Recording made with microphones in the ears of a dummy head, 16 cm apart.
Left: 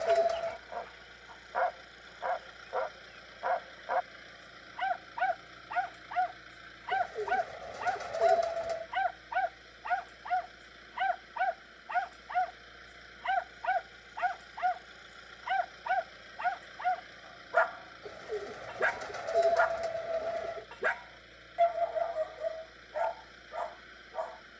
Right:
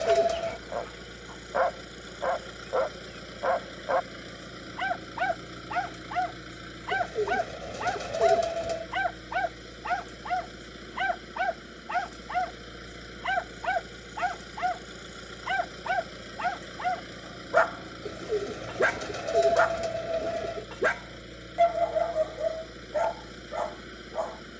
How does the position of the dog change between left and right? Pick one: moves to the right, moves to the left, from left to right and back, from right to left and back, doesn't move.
doesn't move.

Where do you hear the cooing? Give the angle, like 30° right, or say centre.
40° right.